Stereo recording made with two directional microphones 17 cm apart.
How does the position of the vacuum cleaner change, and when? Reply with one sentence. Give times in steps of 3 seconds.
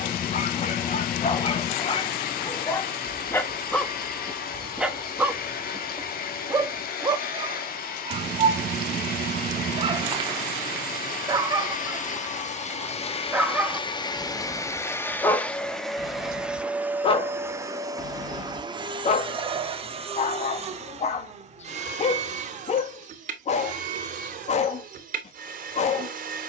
You can hear the vacuum cleaner on the left from 0 s, in the centre from 15 s and on the right from 18 s.